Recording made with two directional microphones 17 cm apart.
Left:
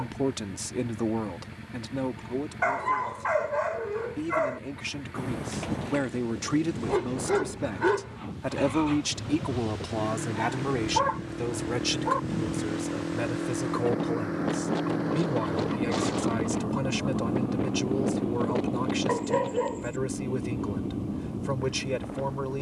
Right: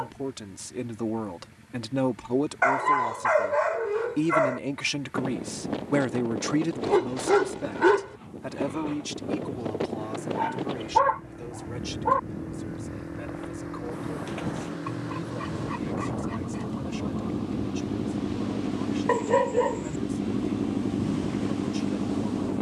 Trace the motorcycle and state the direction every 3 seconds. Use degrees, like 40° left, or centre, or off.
50° left, 50° left, 50° left, 40° left, 30° left, 10° left, 20° right, 50° right.